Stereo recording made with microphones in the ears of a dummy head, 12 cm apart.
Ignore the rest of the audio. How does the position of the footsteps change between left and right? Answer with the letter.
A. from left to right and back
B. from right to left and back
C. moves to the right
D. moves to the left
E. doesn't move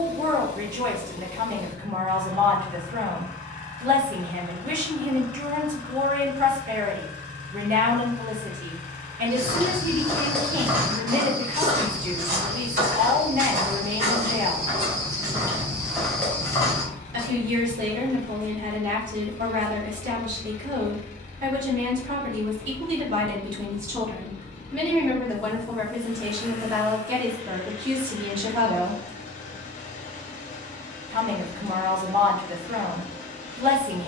A.